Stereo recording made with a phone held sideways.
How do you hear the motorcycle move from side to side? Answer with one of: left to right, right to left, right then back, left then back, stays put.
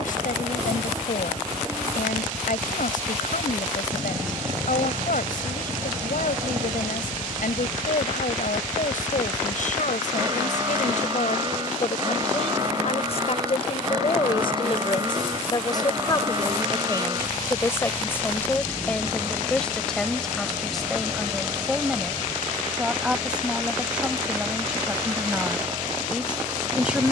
stays put.